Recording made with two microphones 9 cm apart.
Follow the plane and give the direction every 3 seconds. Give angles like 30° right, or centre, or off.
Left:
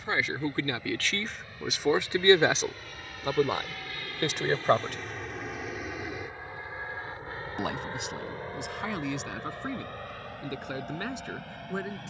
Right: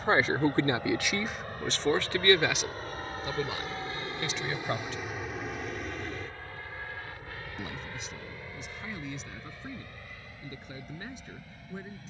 50° right, 20° right, 30° left, 50° left.